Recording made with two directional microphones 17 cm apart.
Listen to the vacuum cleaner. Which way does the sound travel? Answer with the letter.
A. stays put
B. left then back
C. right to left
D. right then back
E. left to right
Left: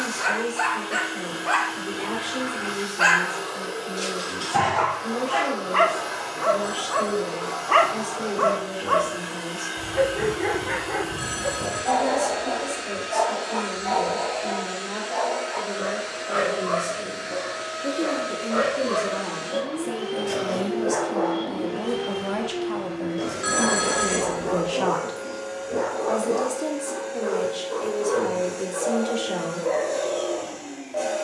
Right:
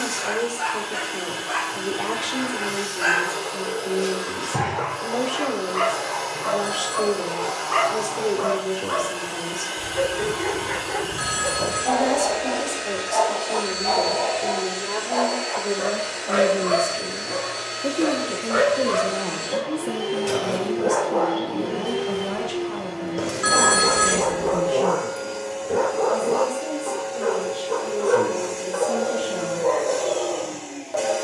A.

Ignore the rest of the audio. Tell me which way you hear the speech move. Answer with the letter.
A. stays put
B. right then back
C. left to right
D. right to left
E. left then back
D.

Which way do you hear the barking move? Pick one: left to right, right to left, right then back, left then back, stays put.
left to right.